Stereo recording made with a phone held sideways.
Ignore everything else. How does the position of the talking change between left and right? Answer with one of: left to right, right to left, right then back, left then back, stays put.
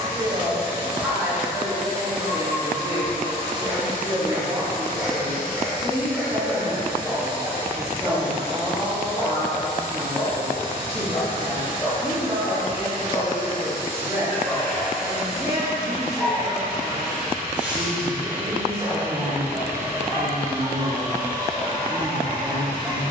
stays put.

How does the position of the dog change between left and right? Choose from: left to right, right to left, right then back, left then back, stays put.
left then back.